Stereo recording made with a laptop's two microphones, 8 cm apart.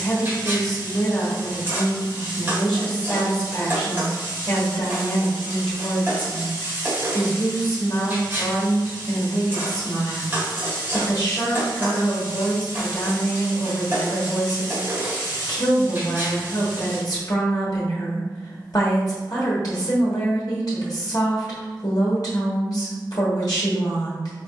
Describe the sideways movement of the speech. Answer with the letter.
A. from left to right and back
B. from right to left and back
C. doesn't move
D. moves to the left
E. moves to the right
C.